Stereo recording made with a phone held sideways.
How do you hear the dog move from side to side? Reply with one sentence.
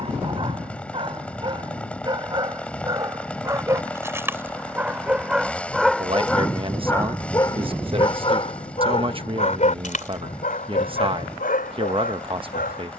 You can hear the dog move from right to left.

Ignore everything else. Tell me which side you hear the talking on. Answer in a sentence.
You can hear the talking on the right.